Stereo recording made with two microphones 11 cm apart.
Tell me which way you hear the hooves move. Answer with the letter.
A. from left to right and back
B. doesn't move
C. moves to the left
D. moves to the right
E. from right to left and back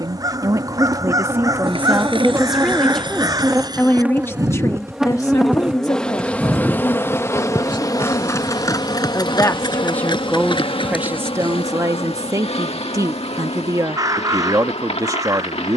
C.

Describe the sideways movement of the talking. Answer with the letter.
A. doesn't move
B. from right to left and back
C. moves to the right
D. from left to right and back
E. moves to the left
B.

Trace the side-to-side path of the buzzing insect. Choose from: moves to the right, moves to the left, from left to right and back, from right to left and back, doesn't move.
moves to the left.